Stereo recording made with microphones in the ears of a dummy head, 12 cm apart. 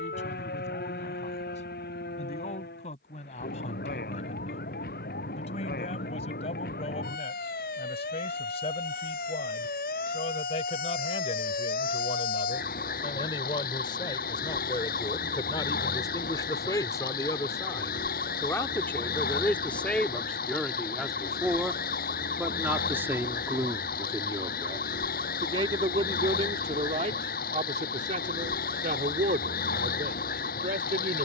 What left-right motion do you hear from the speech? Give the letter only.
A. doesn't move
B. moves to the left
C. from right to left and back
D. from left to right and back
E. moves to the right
E.